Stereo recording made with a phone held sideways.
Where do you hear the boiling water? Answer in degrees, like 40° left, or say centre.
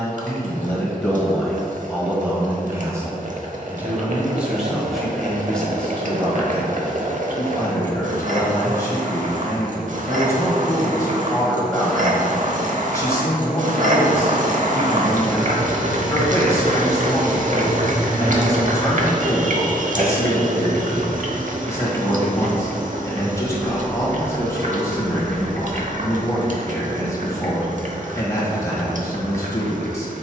60° right.